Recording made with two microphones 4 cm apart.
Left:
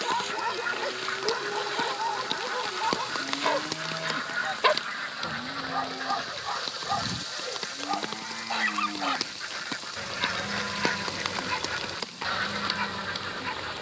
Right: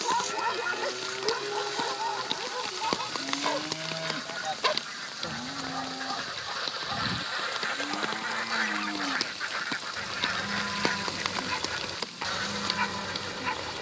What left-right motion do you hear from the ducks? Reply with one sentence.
In this clip you hear the ducks go right and come back.